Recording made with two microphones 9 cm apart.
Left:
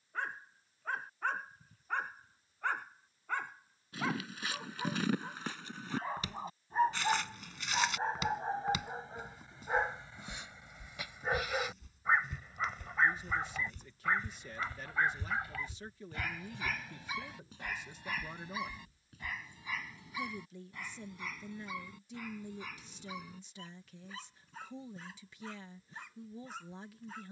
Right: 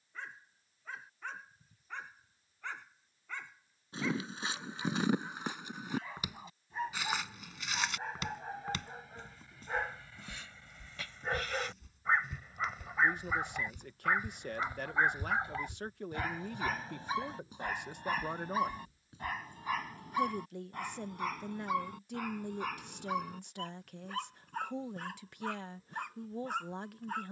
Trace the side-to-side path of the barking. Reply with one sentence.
You can hear the barking move to the right.